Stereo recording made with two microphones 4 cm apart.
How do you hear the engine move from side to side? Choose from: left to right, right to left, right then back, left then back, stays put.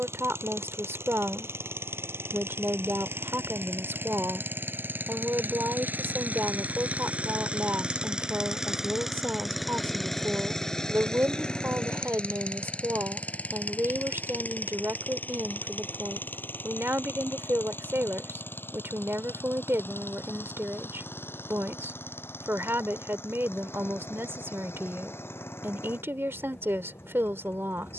right to left.